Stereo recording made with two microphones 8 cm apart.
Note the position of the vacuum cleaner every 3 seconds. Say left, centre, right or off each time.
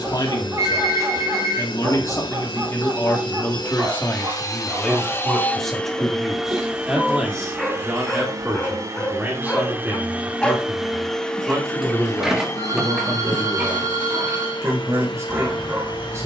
left, left, right, centre, left, left.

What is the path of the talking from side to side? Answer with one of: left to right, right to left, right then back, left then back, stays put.
left to right.